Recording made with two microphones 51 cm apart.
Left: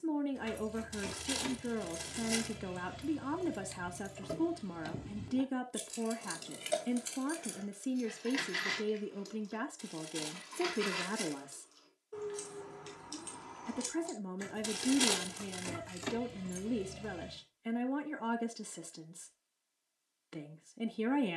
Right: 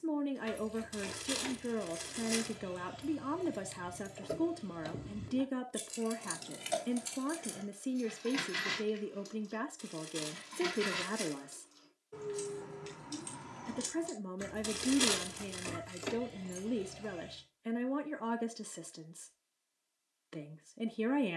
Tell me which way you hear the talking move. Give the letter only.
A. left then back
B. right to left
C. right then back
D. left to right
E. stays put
E.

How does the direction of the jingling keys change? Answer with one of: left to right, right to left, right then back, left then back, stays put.
right then back.